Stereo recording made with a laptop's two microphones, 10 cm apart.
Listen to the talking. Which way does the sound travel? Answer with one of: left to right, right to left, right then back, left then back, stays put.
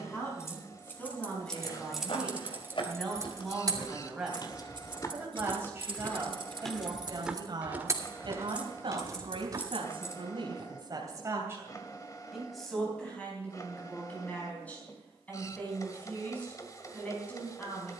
right then back.